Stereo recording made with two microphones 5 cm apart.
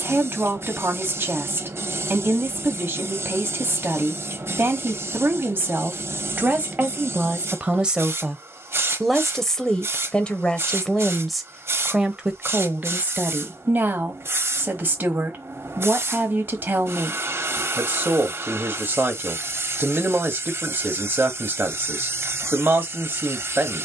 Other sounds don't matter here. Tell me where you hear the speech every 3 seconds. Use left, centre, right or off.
right, right, right, centre, right, right, right, right.